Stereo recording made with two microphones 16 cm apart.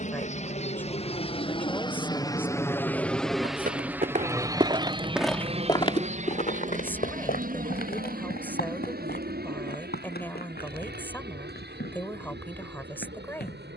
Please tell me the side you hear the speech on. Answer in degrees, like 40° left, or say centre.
10° left.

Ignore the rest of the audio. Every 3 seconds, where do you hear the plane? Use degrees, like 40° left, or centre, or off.
30° left, 20° right, 50° right, 60° right, 70° right.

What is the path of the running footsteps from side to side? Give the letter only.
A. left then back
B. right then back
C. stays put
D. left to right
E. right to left
E.